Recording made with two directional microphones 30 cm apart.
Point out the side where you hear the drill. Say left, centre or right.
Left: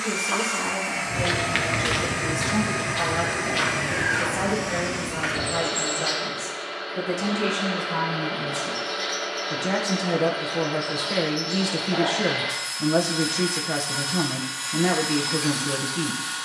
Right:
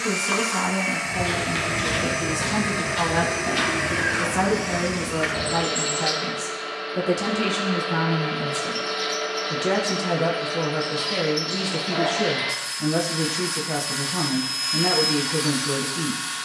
right.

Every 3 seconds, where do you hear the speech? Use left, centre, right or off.
right, right, right, centre, centre, centre.